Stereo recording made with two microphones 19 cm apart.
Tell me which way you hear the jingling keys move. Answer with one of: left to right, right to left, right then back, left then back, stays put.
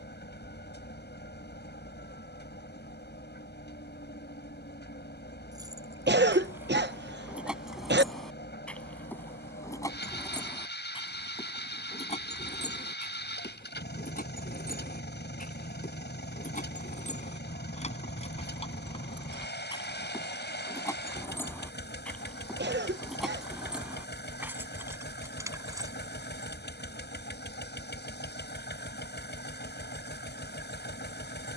left then back.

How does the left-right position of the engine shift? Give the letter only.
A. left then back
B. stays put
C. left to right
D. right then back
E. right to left
B.